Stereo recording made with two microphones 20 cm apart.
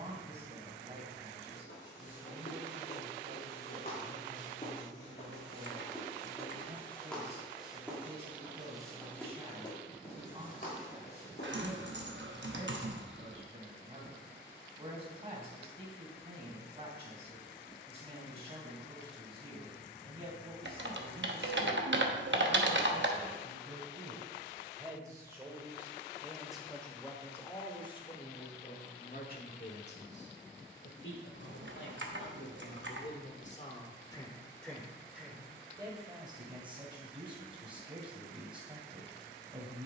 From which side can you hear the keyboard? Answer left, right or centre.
right.